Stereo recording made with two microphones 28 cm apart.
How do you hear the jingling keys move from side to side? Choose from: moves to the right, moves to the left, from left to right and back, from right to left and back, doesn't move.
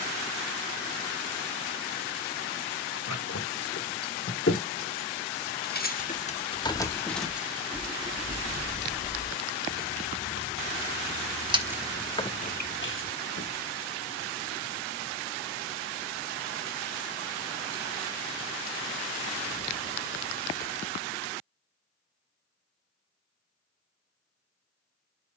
from left to right and back.